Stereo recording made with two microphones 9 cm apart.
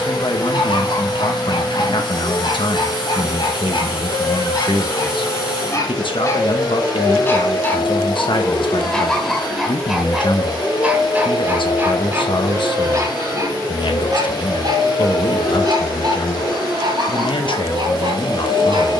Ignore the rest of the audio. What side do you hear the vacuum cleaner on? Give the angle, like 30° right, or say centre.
60° left.